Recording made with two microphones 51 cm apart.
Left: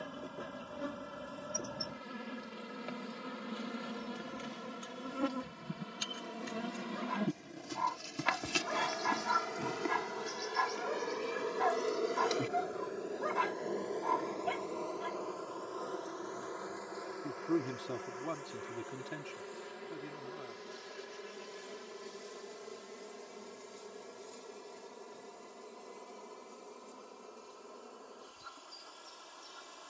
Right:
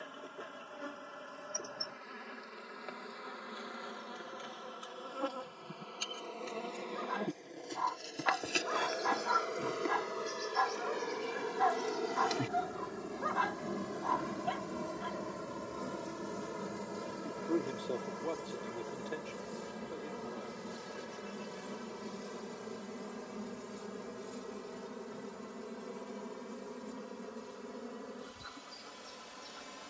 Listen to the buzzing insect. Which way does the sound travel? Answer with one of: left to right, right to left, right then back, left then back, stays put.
left to right.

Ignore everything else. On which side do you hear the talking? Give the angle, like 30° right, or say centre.
30° left.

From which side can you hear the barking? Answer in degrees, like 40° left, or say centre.
50° left.